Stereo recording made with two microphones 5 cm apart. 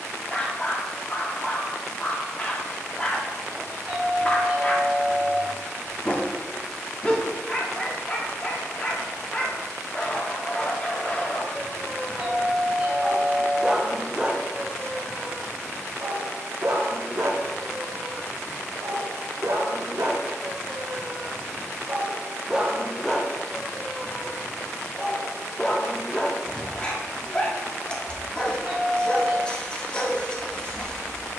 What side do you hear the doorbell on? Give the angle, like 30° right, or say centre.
20° right.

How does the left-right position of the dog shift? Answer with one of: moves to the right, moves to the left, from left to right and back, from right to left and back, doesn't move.
from left to right and back.